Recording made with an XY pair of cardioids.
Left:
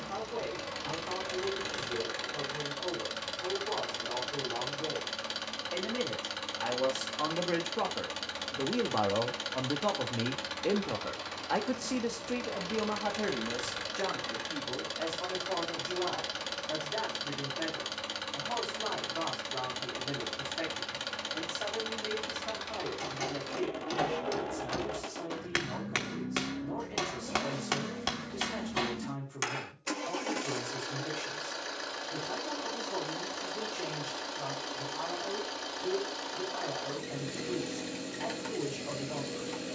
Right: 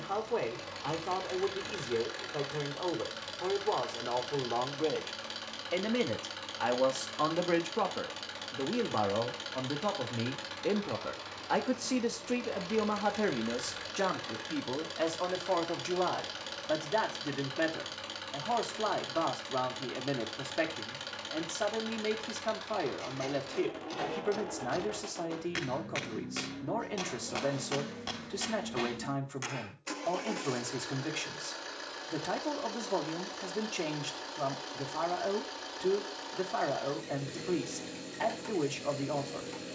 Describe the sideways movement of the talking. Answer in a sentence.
You can hear the talking go left and come back.